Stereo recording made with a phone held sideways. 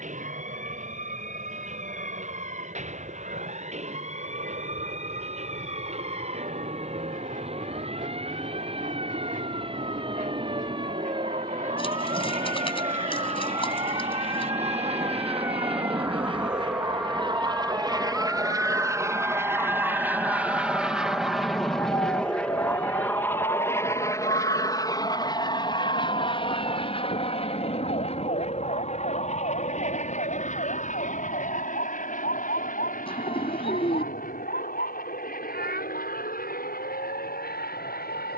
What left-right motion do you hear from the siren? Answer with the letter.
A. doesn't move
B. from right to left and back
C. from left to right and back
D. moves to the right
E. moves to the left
E.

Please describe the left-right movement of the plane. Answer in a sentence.
In this clip you hear the plane travel towards the left.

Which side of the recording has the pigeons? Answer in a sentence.
In this clip you hear the pigeons on the left.